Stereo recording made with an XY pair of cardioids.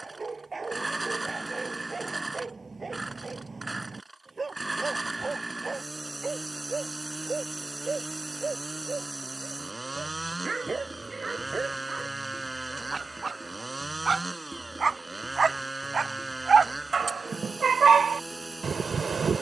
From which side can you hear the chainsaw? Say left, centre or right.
centre.